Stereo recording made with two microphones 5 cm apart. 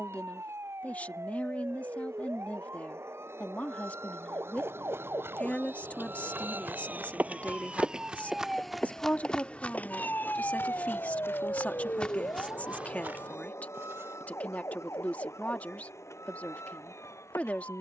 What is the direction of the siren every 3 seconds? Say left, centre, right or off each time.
right, right, right, left, left, left.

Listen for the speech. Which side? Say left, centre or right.
left.